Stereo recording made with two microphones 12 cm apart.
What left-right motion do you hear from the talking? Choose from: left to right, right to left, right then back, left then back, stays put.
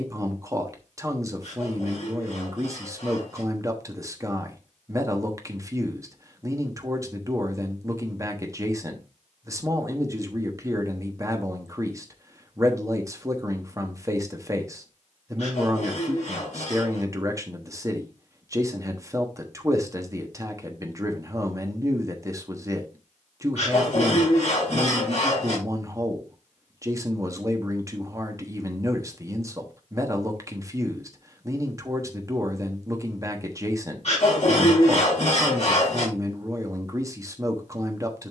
stays put.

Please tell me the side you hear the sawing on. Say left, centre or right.
left.